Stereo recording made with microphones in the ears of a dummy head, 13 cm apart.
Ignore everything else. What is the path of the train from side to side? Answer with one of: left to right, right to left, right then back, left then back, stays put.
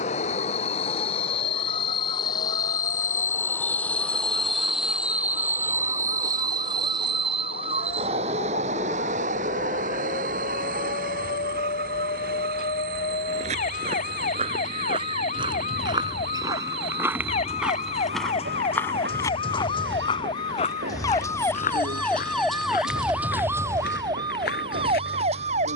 left to right.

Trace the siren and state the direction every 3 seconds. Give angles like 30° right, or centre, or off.
70° left, 70° left, 70° left, 60° left, 60° left, 50° left, 40° left, centre, 40° right.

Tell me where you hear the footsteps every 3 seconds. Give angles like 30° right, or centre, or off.
off, off, off, off, 40° right, 20° right, 30° left, 60° left, 70° left.